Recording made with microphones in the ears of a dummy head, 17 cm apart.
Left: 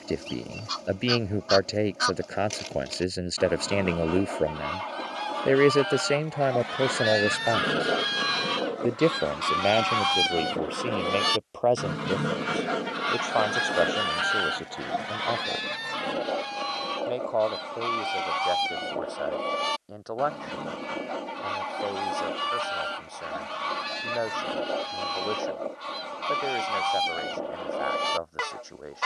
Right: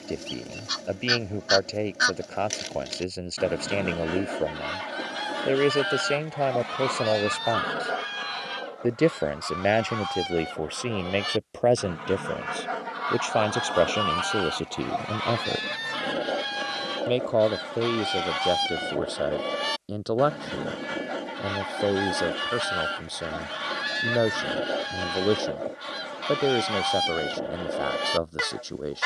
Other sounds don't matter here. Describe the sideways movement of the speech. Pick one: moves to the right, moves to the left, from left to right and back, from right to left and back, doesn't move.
moves to the right.